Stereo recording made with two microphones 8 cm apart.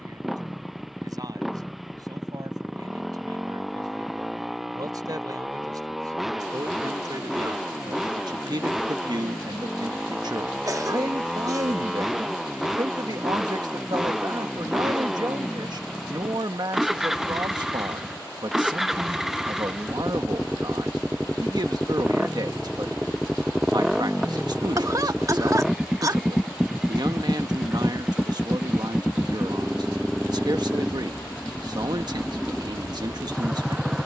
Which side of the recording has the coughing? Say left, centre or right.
right.